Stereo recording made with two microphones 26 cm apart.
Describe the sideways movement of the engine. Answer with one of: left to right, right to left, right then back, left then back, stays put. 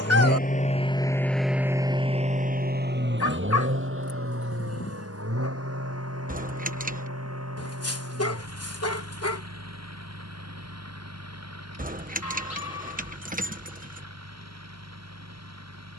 left to right.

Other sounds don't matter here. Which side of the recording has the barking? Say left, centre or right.
left.